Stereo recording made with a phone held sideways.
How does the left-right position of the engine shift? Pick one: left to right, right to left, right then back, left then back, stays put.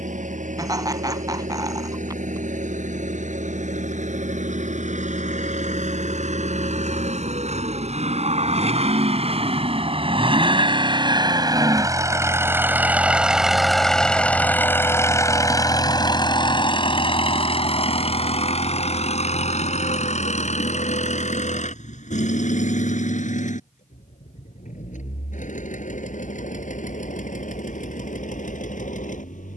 right to left.